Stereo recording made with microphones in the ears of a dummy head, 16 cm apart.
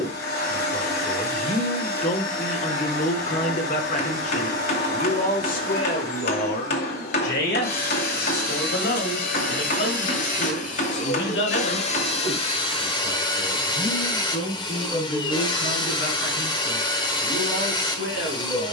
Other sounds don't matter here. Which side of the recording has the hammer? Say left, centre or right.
left.